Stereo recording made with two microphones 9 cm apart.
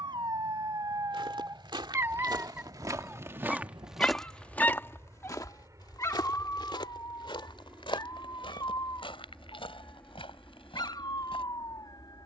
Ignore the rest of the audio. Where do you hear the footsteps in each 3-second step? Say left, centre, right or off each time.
right, centre, left, left.